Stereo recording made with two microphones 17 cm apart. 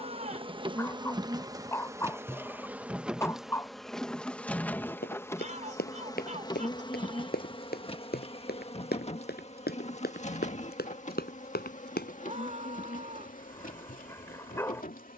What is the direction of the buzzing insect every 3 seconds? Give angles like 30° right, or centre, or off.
20° right, 10° left, 30° left, 50° left, 50° left.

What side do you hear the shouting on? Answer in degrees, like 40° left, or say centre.
50° right.